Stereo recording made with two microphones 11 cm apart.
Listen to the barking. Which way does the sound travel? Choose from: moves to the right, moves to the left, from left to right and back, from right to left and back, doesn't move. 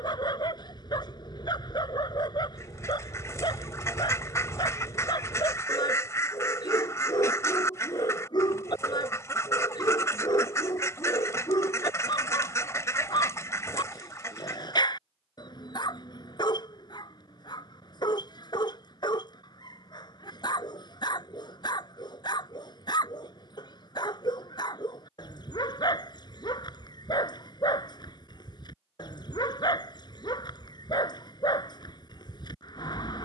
doesn't move.